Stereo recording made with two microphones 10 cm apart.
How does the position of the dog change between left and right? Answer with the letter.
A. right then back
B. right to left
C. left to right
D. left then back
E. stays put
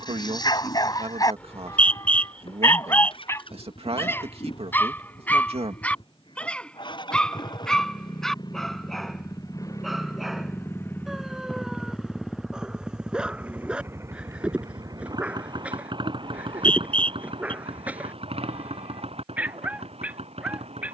C.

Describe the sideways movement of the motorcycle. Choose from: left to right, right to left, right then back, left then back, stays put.
left to right.